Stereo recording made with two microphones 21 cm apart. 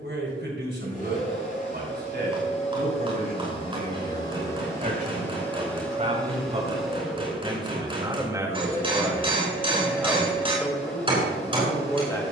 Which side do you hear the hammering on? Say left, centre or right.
right.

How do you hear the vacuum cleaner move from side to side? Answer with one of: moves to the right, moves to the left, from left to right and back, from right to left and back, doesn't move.
moves to the right.